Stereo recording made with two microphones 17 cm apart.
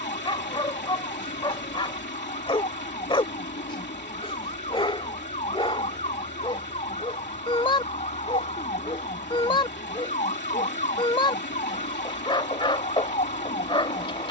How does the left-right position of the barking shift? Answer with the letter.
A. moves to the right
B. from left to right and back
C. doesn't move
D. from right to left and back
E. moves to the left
C.